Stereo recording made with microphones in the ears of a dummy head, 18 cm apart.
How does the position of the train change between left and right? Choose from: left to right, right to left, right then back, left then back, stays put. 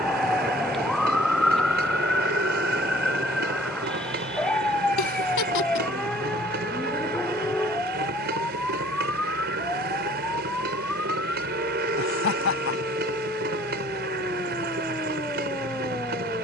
stays put.